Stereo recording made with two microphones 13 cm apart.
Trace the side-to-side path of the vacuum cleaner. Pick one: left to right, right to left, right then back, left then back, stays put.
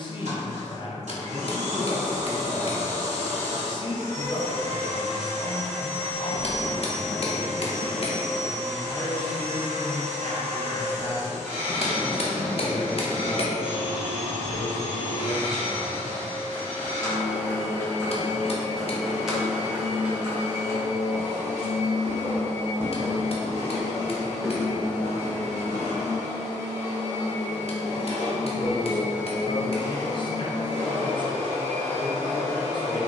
stays put.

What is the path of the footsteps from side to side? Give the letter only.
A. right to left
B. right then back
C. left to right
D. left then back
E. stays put
B.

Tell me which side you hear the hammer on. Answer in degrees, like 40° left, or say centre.
50° left.